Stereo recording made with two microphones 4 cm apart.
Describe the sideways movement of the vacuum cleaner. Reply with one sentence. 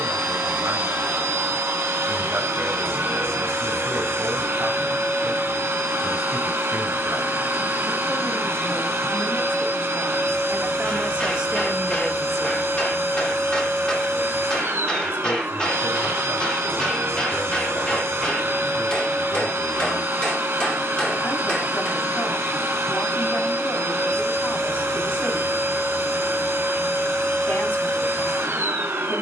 In this clip you hear the vacuum cleaner stay in one place.